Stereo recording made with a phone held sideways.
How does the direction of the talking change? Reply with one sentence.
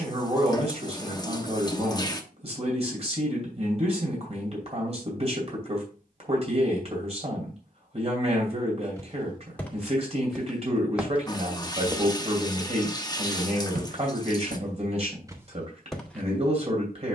You can hear the talking stay put.